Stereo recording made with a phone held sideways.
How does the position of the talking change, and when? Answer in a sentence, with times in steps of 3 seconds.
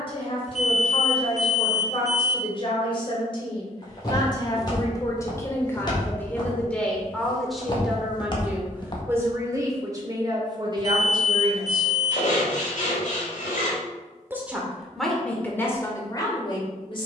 In this clip you hear the talking on the left from 0 s, in the centre from 6 s, on the right from 9 s, in the centre from 12 s and on the left from 15 s.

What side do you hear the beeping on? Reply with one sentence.
You can hear the beeping on the left.